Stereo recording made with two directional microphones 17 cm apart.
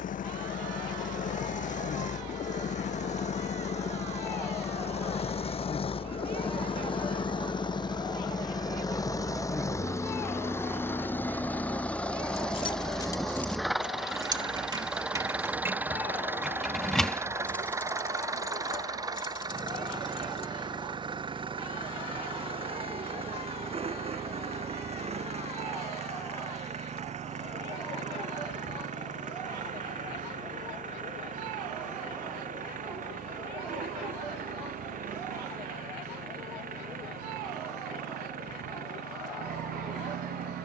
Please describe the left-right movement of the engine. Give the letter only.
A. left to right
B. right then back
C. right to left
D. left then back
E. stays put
A.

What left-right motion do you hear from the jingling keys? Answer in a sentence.
In this clip you hear the jingling keys go right and come back.